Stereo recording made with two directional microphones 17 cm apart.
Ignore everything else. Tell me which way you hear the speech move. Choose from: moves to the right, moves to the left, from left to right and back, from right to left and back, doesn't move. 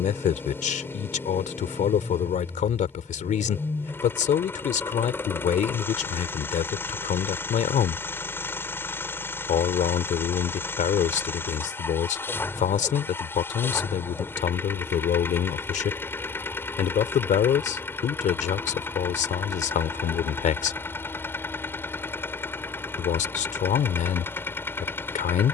doesn't move.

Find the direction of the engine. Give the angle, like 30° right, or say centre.
10° left.